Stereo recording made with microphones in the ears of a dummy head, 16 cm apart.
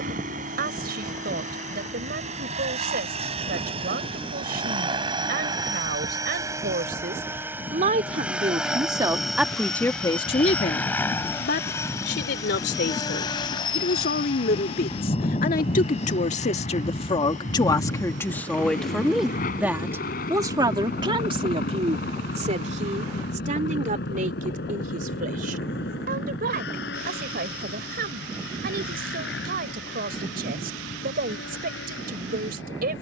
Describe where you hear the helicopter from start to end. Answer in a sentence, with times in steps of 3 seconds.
In this clip you hear the helicopter on the right from 0 s, in the centre from 6 s and on the left from 12 s.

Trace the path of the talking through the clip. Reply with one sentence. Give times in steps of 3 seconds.
In this clip you hear the talking on the right from 0 s, on the left from 9 s, in the centre from 18 s and on the right from 21 s.